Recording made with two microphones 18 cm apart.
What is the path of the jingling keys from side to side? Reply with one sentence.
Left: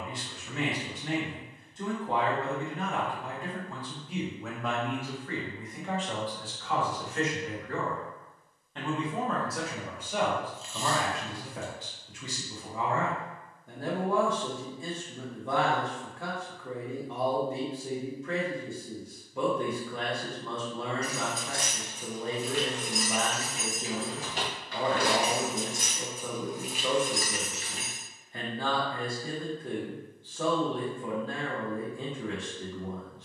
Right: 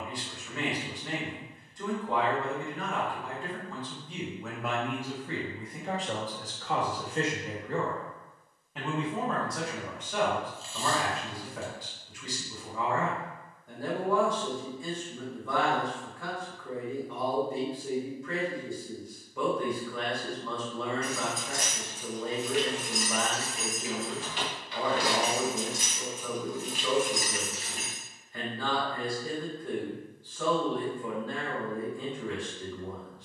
In this clip you hear the jingling keys move from right to left and back again.